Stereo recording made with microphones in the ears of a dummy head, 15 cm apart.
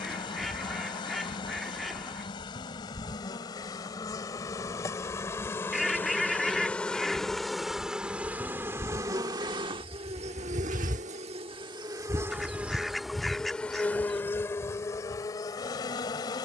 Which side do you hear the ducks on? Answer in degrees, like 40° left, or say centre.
centre.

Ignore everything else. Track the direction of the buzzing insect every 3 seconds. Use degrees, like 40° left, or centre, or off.
30° left, 20° left, centre, 30° right, centre, 20° left.